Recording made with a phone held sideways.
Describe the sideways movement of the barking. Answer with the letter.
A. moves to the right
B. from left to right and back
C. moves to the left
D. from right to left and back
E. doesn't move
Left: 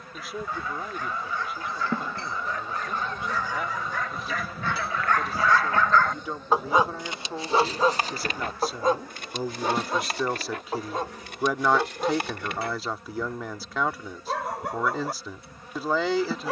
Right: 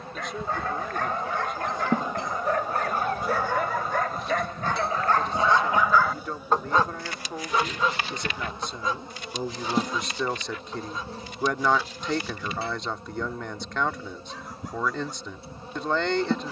C.